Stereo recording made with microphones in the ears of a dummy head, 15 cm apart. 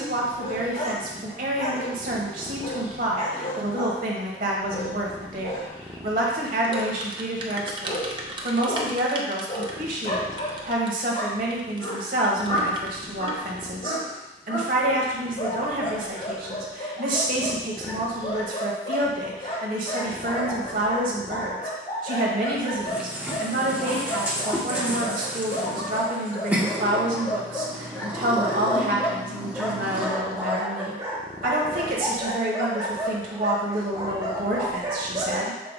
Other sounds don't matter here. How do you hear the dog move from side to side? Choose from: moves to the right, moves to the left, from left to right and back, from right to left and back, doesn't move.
moves to the right.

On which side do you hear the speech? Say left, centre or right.
right.